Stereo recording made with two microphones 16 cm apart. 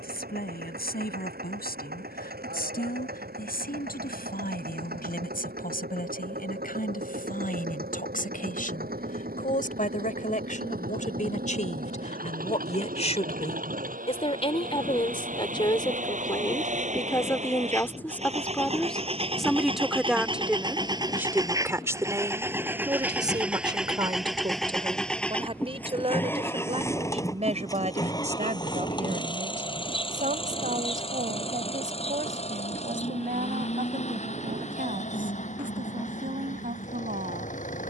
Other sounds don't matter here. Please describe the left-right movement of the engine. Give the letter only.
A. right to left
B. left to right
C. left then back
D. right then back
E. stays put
A.